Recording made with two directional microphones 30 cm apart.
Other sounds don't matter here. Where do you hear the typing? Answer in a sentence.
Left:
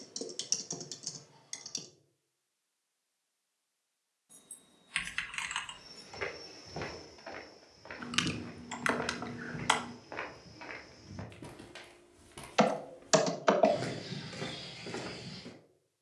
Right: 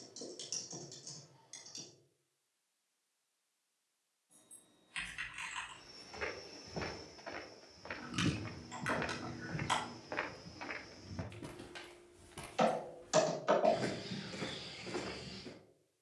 You can hear the typing on the left.